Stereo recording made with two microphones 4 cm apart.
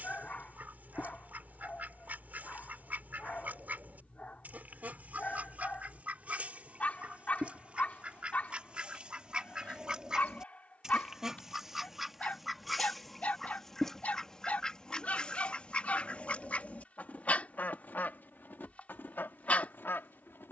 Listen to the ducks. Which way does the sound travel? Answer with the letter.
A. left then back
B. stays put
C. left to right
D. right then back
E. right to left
E.